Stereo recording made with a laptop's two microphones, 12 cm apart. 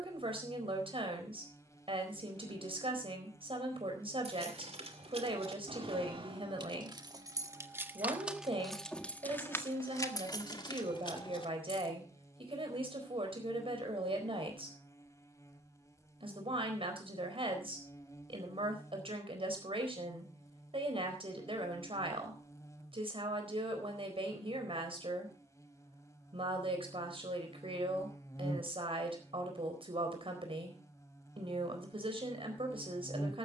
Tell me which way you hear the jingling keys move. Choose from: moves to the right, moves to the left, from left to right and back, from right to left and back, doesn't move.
moves to the left.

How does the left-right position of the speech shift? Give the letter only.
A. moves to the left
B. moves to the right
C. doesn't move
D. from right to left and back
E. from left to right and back
C.